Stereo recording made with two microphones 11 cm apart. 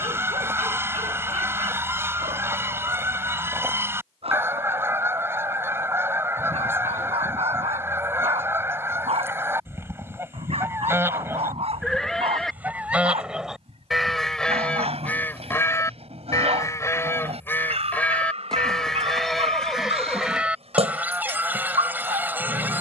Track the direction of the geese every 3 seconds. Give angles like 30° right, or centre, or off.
20° right, 20° right, 20° right, 20° right, centre, 20° left, centre, 20° right.